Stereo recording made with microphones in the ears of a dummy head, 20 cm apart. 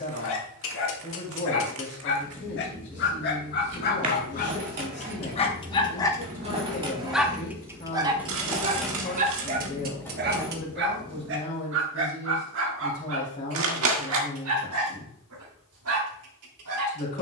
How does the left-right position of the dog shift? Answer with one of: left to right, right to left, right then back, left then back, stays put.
left to right.